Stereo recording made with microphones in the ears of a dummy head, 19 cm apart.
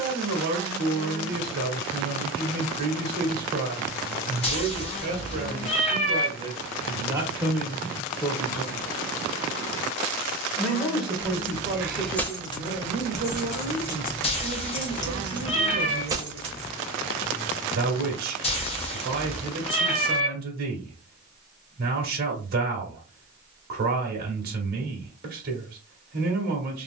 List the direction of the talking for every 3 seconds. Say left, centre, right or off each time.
right, right, centre, centre, right, right, right, right, right.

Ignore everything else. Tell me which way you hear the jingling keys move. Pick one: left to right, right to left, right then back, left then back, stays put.
left then back.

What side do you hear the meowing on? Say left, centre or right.
left.